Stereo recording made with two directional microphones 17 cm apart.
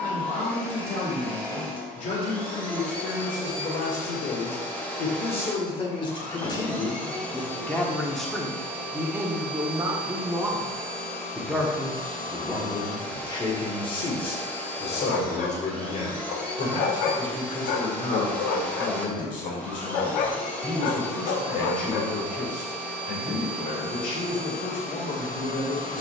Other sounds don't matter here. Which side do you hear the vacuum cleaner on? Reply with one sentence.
In this clip you hear the vacuum cleaner in the centre.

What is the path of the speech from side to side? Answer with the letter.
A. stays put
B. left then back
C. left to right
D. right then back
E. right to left
D.